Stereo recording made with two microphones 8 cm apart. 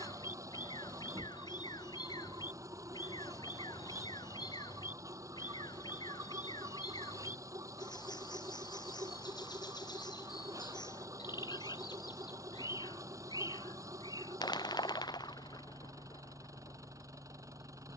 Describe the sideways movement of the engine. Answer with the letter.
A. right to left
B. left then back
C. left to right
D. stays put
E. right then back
D.